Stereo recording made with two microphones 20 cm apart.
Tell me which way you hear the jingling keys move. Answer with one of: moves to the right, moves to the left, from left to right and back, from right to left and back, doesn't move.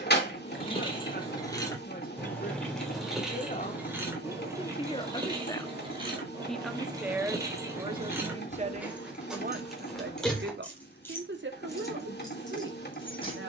from left to right and back.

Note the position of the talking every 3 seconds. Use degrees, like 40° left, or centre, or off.
50° left, 30° left, 20° right, 60° right, 70° right.